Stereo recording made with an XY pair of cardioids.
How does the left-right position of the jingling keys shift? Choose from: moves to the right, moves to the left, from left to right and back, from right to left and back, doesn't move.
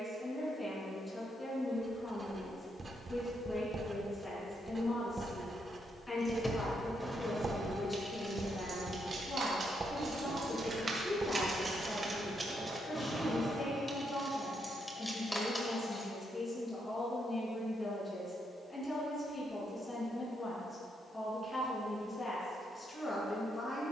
from left to right and back.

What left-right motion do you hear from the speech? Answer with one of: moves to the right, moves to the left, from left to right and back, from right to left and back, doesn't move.
doesn't move.